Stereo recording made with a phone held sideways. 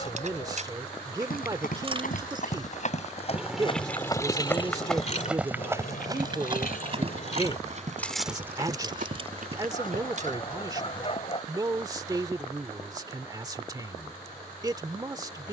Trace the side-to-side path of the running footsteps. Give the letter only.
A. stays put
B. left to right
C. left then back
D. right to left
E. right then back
B.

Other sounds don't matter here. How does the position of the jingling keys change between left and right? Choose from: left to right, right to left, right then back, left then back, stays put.
left then back.